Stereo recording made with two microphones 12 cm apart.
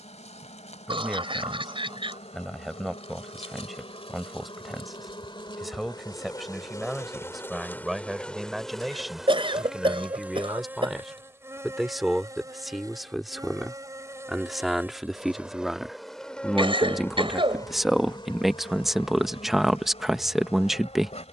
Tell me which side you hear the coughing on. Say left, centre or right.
right.